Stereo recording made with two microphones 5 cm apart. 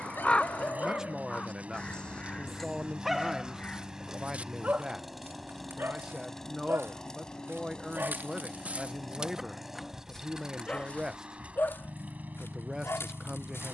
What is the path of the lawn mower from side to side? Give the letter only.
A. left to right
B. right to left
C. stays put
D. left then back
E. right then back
D.